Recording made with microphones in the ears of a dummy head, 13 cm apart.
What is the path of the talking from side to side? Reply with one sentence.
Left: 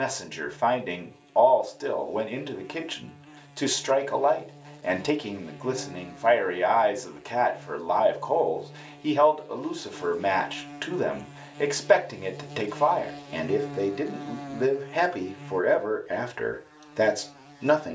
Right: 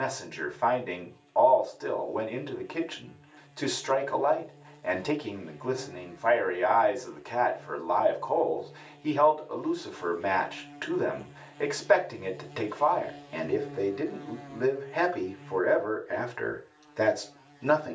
You can hear the talking stay in one place.